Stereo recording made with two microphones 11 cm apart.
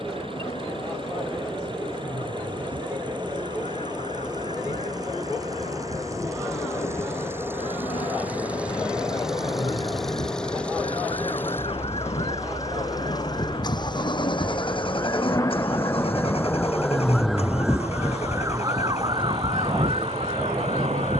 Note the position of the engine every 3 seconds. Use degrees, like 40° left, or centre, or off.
50° right, 40° right, 20° right, 10° left, 40° left, 60° left, 70° left.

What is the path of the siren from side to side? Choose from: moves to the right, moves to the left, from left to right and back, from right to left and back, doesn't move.
moves to the right.